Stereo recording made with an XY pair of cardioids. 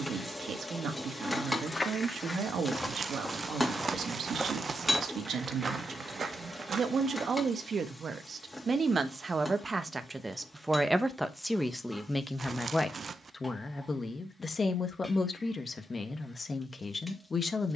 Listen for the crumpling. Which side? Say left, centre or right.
right.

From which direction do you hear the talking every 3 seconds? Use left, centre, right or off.
right, right, right, centre, left, left.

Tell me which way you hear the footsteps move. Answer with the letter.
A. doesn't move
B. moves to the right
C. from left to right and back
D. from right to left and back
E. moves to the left
B.